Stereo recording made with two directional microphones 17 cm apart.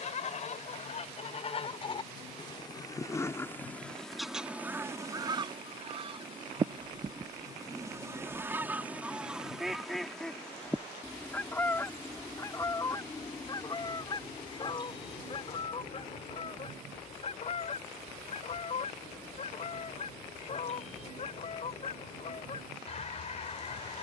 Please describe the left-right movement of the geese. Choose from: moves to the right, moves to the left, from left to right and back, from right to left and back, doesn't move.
from left to right and back.